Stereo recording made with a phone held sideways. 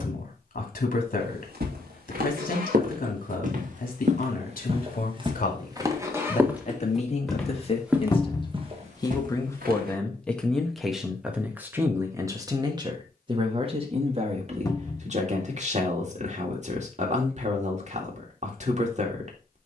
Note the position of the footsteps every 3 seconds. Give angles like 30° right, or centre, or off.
60° right, 40° right, 10° right, 60° right, off, off, off.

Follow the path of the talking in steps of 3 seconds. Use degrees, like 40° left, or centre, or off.
60° left, 60° left, 40° left, centre, 30° right, 40° right, 40° right.